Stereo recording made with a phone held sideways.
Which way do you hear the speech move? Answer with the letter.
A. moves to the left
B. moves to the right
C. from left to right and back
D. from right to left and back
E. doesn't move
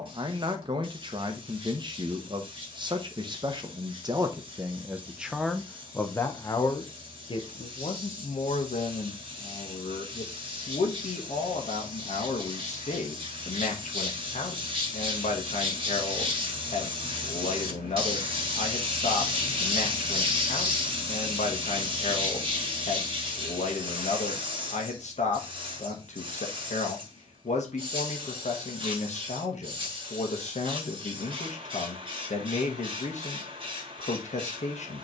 A.